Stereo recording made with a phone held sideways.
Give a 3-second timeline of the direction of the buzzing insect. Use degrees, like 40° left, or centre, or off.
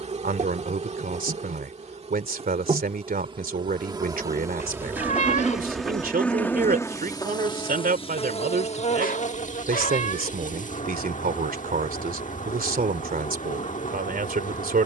40° right, 20° right, 30° left, 50° left, 50° left.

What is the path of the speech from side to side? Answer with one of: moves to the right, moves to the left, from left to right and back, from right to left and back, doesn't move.
doesn't move.